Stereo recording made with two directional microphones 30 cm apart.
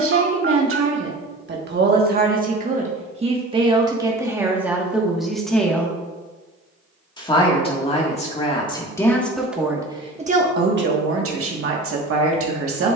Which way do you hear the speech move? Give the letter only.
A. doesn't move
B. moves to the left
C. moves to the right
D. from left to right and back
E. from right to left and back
E.